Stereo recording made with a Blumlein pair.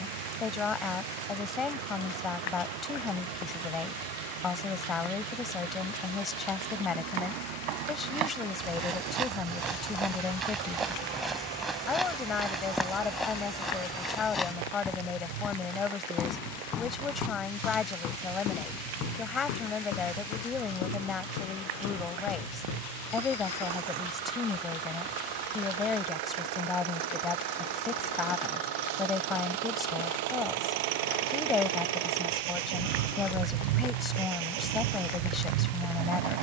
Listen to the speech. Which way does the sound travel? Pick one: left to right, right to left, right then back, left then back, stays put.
stays put.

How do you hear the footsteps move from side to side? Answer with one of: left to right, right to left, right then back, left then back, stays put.
right to left.